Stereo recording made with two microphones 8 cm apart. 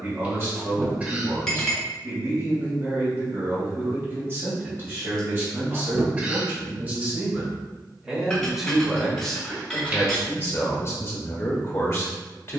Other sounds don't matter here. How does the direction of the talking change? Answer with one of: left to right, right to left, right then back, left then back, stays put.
right to left.